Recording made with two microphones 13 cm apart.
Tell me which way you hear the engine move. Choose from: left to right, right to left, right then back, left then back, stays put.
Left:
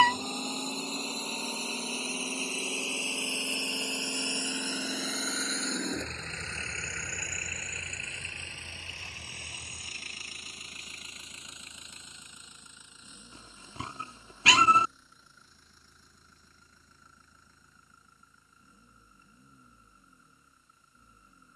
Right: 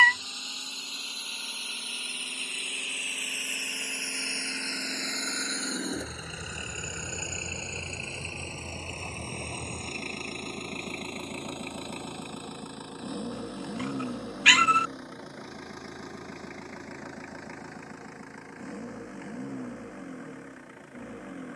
left to right.